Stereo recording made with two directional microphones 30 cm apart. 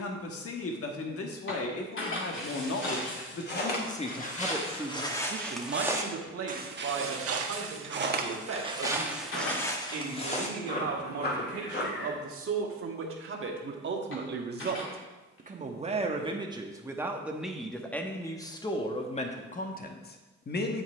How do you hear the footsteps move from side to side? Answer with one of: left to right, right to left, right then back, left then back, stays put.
right then back.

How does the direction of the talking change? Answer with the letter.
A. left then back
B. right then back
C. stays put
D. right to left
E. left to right
B.